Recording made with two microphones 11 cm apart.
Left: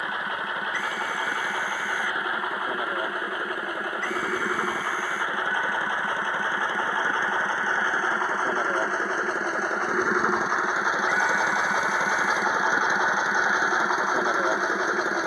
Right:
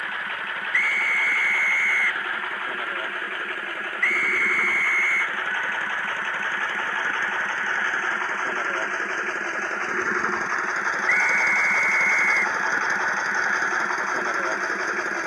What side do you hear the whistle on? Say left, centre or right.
left.